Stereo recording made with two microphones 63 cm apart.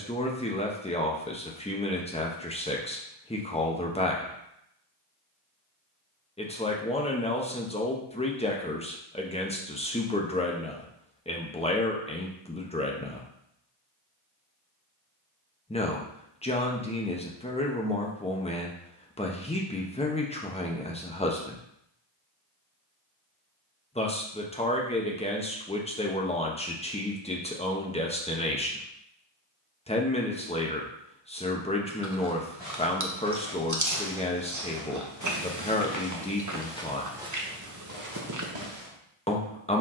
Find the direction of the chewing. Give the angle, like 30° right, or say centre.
30° right.